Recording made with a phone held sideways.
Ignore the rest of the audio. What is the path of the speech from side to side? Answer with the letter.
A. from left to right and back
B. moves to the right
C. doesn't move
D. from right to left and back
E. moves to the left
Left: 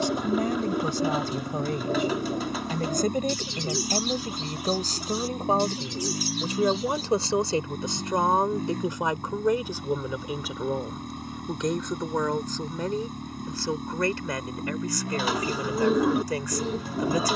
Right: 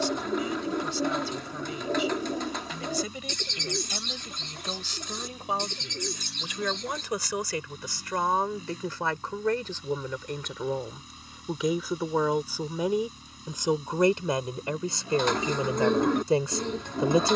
B.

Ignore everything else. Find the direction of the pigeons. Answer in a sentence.
In this clip you hear the pigeons in the centre.